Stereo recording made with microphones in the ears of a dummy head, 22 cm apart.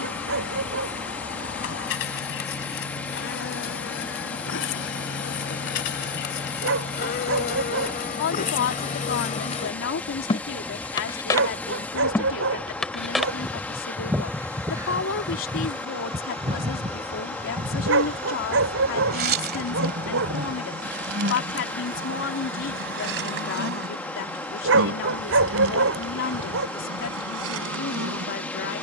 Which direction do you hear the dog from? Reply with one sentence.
You can hear the dog on the right.